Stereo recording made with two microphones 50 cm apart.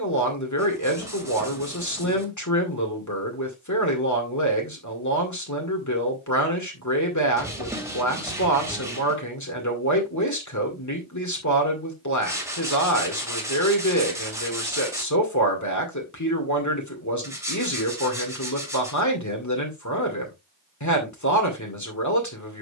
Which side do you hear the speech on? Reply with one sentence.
You can hear the speech on the left.